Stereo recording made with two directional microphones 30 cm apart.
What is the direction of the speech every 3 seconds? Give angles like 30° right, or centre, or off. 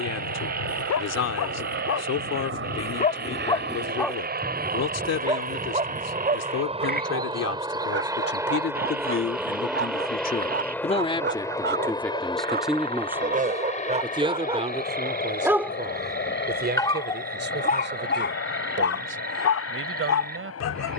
60° left, 60° left, 50° left, 30° left, 10° right, 30° right, 40° right.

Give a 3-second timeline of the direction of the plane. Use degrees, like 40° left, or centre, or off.
50° right, 30° right, 20° right, centre, 20° left, 30° left, 40° left.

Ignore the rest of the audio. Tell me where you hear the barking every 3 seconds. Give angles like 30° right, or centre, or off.
60° left, centre, 30° right, 40° right, 20° right, 10° left, 50° left.